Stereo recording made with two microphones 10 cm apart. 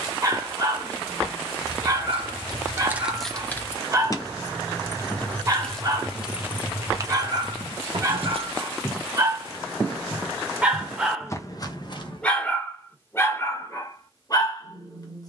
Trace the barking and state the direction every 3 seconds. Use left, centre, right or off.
right, right, right, centre, left.